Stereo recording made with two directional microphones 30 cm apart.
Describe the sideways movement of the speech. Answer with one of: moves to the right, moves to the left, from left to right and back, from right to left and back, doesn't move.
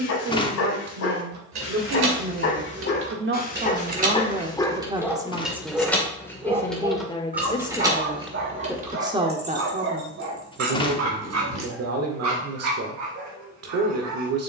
from right to left and back.